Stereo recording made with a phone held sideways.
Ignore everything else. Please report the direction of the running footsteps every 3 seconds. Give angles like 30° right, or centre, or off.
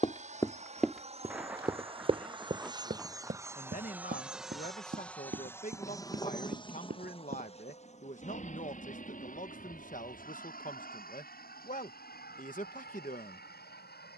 10° right, 60° right, 70° right, off, off.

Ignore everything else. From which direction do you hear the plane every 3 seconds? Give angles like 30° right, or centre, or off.
40° right, centre, 40° left, 60° left, 70° left.